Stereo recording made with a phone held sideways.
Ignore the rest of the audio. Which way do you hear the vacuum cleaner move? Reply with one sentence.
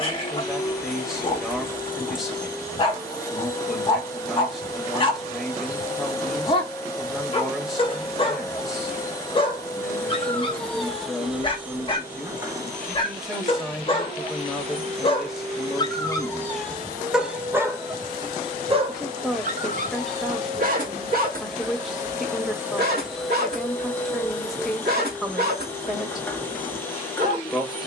You can hear the vacuum cleaner move from left to right and back again.